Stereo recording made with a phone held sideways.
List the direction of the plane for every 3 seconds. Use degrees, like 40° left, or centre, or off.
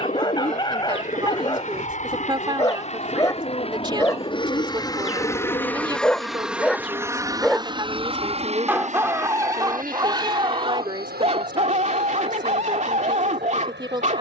60° left, 30° left, 20° right, 60° right, 70° right.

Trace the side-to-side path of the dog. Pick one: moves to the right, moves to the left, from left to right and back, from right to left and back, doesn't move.
moves to the right.